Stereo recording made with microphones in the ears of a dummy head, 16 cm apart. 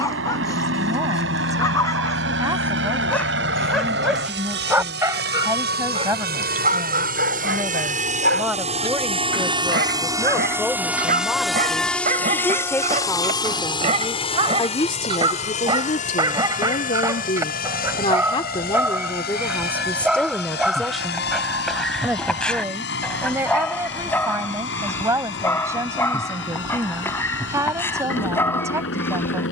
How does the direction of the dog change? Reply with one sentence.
In this clip you hear the dog go right and come back.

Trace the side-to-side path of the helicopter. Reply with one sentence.
In this clip you hear the helicopter go from the right side to the left.